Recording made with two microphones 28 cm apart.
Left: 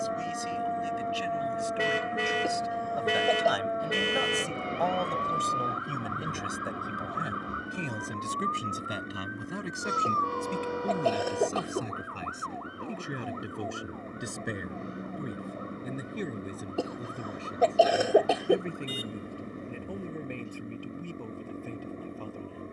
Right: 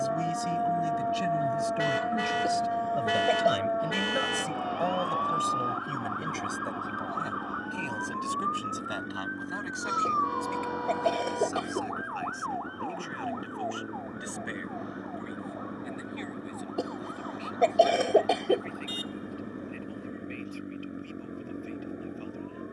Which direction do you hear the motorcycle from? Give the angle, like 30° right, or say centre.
10° right.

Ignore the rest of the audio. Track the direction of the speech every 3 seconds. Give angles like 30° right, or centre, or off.
50° right, 20° right, 20° left, 40° left, 50° left, 50° left, 60° left, 60° left.